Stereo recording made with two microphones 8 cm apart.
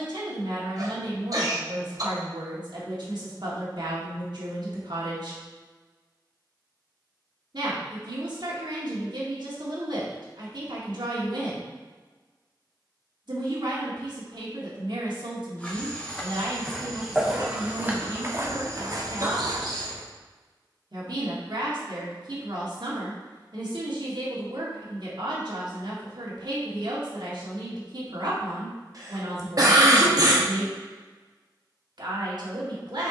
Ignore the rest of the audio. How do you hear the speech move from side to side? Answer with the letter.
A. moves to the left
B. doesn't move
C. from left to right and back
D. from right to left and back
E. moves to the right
B.